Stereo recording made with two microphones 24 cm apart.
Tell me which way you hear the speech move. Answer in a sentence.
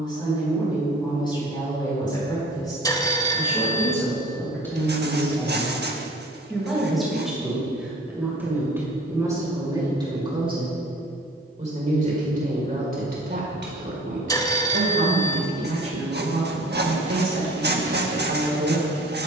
In this clip you hear the speech travel towards the right.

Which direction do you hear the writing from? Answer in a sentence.
In this clip you hear the writing on the right.